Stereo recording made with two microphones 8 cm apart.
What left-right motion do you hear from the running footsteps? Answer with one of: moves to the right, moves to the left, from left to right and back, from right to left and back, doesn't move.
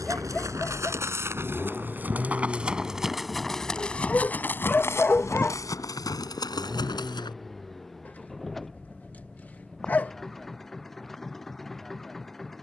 moves to the left.